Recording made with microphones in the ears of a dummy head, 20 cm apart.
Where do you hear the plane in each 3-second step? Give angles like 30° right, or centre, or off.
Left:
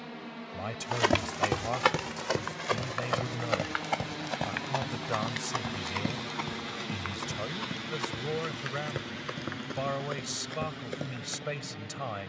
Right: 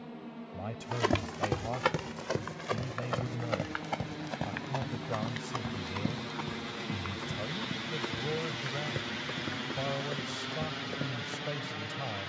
50° left, 40° left, centre, 30° right.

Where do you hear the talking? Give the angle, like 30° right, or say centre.
40° left.